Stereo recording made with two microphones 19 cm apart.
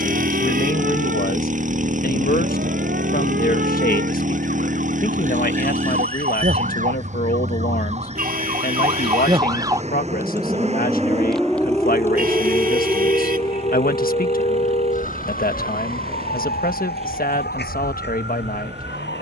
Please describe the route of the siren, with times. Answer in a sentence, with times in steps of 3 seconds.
In this clip you hear the siren on the right from 0 s, in the centre from 9 s and on the left from 12 s.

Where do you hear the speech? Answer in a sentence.
You can hear the speech on the left.